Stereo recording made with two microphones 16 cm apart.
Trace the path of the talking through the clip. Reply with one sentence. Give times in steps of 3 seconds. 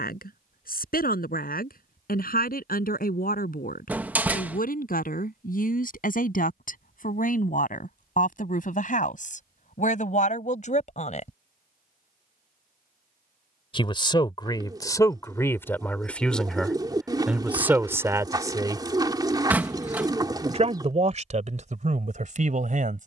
In this clip you hear the talking on the left from 0 s, in the centre from 15 s and on the right from 18 s.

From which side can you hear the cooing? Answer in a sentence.
In this clip you hear the cooing on the right.